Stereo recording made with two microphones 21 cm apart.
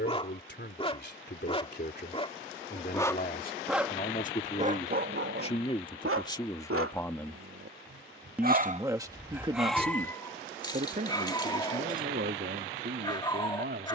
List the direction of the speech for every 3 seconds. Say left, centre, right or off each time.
left, left, centre, right, right.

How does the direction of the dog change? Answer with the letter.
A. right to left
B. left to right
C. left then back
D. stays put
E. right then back
E.